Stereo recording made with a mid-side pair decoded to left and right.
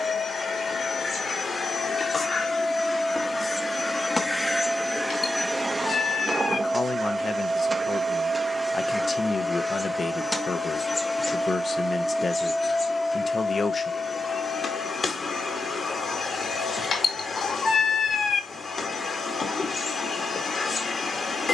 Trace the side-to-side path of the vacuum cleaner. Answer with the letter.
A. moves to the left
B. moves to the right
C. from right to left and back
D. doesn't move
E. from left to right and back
E.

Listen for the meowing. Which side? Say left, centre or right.
left.